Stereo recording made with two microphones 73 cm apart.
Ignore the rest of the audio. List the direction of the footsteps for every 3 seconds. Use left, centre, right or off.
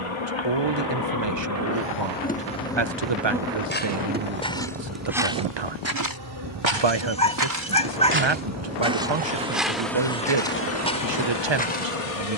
off, centre, right, centre.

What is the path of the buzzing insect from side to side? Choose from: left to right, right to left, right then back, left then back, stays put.
right then back.